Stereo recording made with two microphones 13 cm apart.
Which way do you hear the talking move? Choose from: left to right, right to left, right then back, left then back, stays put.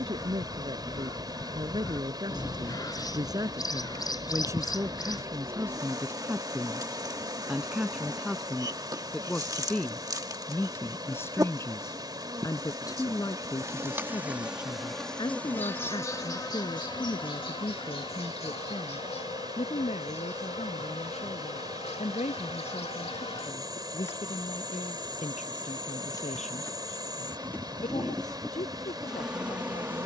right to left.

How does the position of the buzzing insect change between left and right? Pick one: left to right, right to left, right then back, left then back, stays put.
left then back.